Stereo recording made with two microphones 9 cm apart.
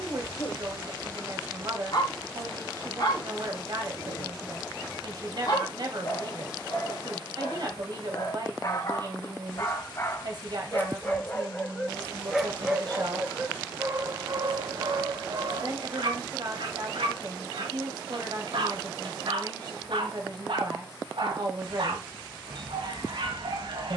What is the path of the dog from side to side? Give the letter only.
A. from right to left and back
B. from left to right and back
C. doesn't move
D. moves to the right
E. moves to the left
D.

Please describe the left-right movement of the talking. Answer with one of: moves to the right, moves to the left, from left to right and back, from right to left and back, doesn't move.
doesn't move.